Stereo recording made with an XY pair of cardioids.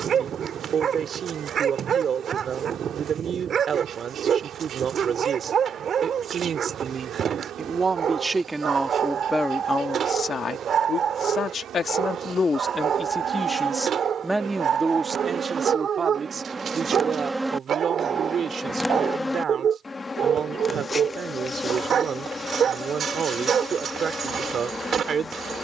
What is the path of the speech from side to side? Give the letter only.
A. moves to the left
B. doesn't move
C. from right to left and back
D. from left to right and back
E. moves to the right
C.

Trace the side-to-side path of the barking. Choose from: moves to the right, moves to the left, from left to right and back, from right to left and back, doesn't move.
doesn't move.